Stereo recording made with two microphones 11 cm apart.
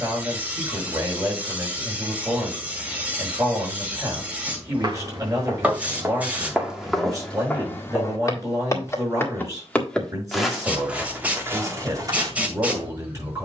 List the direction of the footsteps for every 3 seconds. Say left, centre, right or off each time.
off, right, centre, centre, right.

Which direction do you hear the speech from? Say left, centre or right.
right.